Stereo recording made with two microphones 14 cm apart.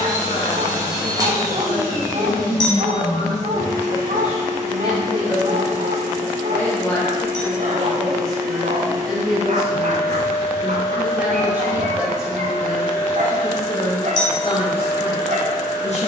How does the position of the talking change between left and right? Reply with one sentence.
In this clip you hear the talking go right and come back.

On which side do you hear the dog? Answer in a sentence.
You can hear the dog on the right.